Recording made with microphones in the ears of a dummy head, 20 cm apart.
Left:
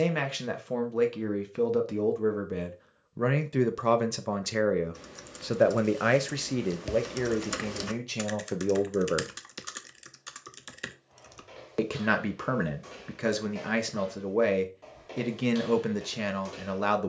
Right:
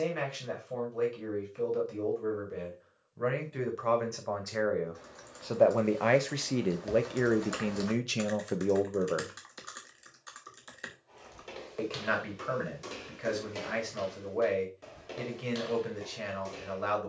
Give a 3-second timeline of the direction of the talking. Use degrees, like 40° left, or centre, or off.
70° left, 40° left, centre, 40° left, 70° left, 70° left.